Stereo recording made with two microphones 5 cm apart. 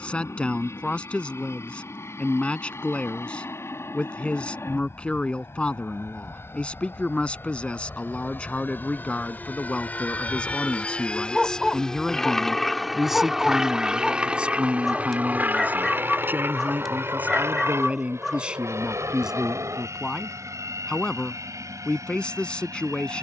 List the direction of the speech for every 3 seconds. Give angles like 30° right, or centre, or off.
20° left, 20° left, 20° left, 20° left, 10° right, 30° right, 10° right, 20° left.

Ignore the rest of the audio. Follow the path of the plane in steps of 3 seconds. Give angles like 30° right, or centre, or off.
60° left, 60° left, 50° left, 30° left, 10° right, 40° right, 60° right, 70° right.